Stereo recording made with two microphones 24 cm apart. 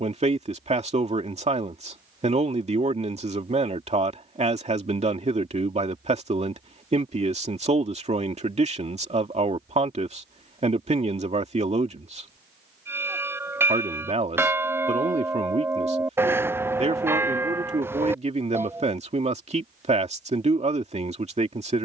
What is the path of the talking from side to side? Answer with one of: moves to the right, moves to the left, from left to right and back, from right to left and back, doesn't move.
doesn't move.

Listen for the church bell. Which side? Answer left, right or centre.
centre.